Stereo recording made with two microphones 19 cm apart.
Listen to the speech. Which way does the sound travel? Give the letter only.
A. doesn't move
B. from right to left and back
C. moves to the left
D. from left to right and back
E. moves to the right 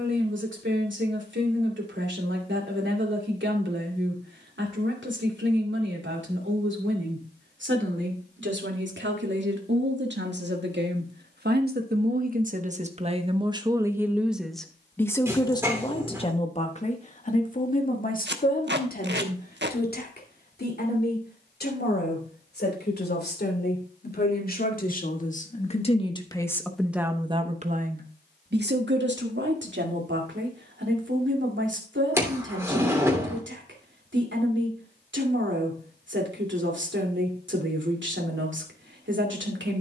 B.